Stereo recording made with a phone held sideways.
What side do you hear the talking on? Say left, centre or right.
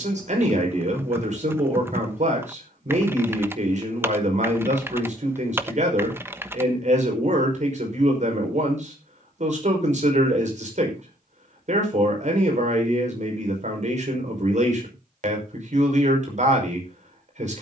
right.